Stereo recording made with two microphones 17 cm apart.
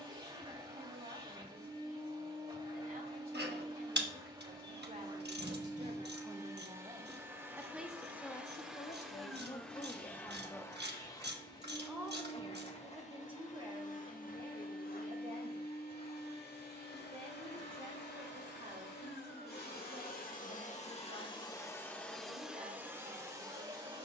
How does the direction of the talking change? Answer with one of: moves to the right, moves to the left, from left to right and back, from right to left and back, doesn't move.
from right to left and back.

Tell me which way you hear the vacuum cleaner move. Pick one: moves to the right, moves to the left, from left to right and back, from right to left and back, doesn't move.
from right to left and back.